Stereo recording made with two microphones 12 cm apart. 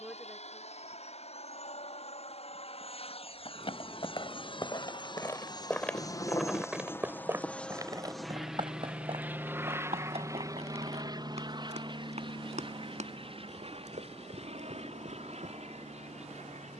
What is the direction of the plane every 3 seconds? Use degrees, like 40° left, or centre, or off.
60° left, 50° left, 10° left, 30° right, 40° right, 50° right.